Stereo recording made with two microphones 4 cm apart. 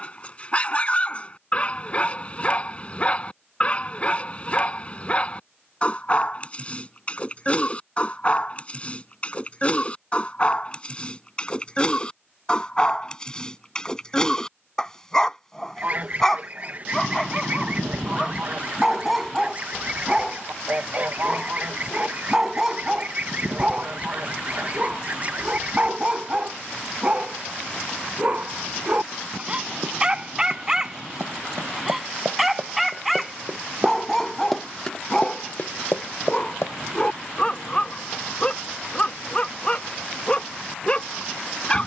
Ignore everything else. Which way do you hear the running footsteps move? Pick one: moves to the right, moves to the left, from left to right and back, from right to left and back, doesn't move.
moves to the left.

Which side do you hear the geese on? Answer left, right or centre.
right.